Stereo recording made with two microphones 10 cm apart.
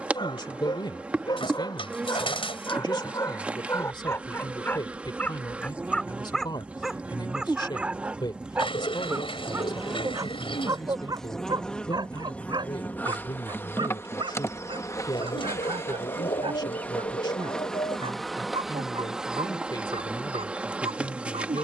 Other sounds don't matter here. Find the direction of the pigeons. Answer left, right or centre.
left.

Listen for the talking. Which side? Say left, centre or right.
left.